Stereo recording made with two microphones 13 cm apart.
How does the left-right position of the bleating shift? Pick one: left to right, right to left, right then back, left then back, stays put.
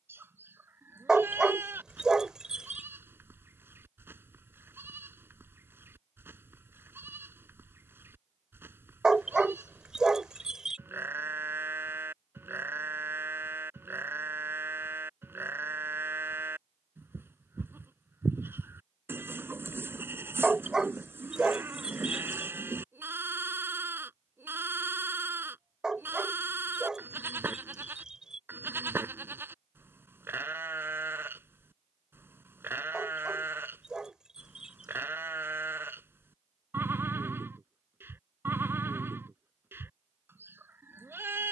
stays put.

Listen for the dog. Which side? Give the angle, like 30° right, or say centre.
10° right.